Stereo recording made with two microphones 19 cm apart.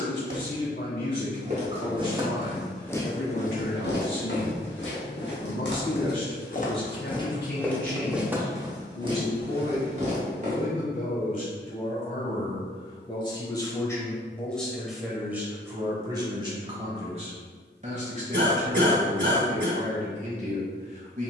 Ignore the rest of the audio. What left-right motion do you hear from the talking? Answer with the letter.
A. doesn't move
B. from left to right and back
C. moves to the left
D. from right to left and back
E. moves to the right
E.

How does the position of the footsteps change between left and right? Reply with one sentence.
You can hear the footsteps move from right to left and back again.